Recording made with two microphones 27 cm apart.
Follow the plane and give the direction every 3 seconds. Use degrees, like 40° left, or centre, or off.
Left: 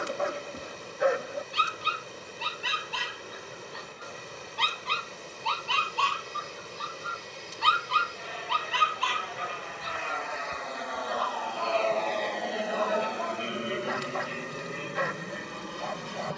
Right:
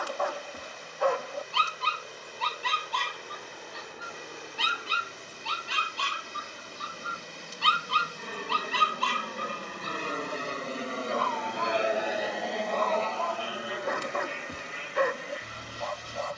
80° right, 70° right, 70° right, 40° right, 20° left, 50° left.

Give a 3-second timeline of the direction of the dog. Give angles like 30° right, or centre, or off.
20° left, 10° right, 30° right, 50° right, 60° right, 60° right.